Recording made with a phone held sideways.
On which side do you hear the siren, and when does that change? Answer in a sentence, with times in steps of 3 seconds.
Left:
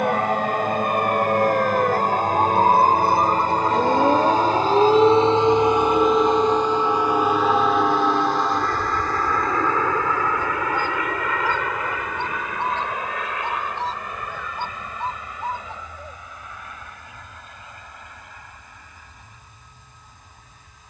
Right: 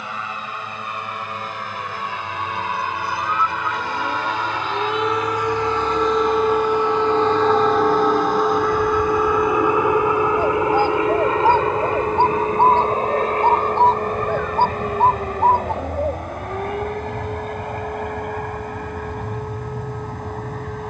You can hear the siren on the left from 0 s and on the right from 6 s.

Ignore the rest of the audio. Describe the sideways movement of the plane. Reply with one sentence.
You can hear the plane travel towards the right.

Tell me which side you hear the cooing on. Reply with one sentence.
You can hear the cooing on the right.